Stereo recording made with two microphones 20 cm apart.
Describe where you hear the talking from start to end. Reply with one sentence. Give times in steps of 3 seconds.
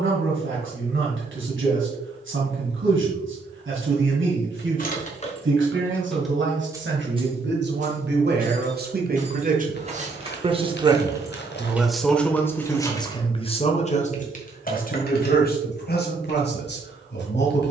In this clip you hear the talking on the right from 0 s and on the left from 12 s.